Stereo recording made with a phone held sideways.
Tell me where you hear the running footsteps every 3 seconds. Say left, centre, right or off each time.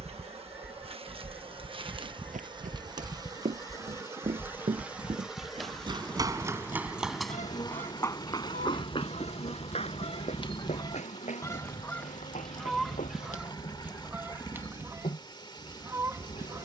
right, right, centre, left, left, off.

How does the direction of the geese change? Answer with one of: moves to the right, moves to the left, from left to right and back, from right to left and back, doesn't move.
from right to left and back.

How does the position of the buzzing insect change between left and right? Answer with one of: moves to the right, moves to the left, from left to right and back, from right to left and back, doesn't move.
moves to the left.